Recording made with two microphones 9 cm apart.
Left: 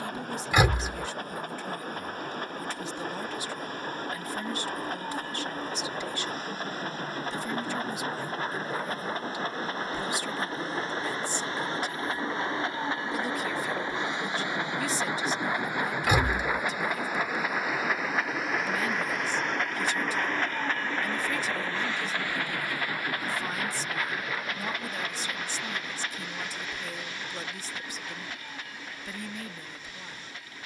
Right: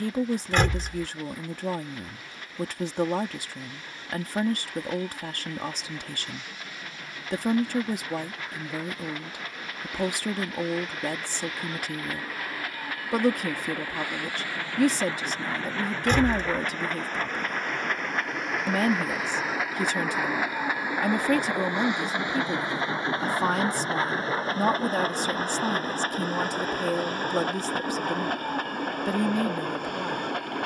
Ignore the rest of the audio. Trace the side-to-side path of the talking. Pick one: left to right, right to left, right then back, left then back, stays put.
stays put.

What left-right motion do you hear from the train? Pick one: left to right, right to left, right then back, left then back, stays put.
left to right.